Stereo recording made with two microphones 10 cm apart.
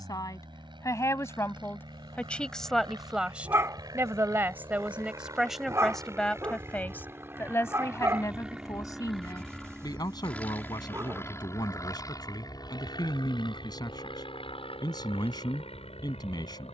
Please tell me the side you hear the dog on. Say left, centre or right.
right.